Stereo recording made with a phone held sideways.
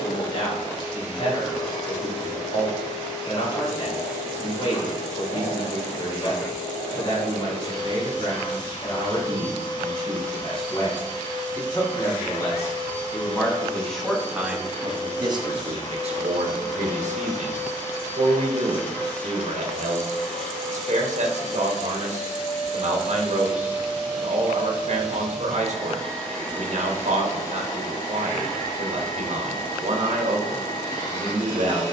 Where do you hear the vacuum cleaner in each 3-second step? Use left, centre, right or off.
left, left, left, left, left, left, centre, centre, centre, left, left.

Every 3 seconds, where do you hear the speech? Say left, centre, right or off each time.
left, left, left, left, centre, right, right, right, right, right, right.